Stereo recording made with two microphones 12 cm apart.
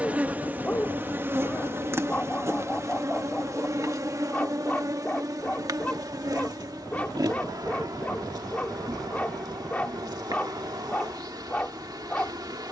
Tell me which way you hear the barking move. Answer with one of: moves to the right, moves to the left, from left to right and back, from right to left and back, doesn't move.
doesn't move.